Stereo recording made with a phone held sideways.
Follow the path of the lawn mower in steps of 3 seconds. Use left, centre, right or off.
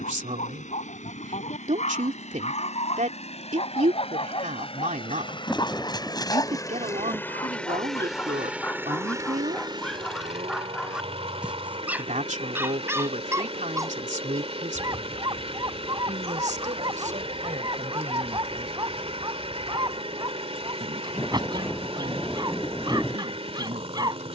left, left, centre, right, right, right, right, right.